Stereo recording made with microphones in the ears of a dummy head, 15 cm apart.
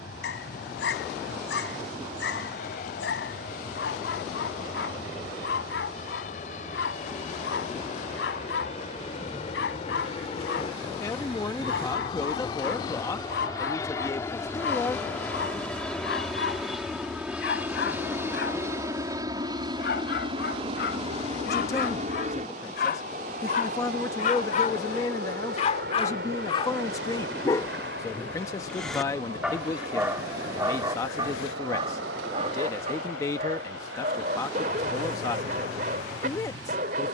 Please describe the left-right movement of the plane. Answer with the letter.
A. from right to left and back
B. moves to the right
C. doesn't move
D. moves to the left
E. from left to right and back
B.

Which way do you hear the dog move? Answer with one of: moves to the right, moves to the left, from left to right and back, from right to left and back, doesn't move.
moves to the right.